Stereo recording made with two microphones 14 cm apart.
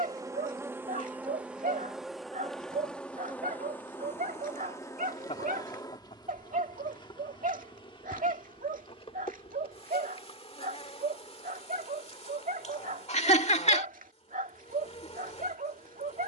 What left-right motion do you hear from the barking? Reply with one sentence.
In this clip you hear the barking stay put.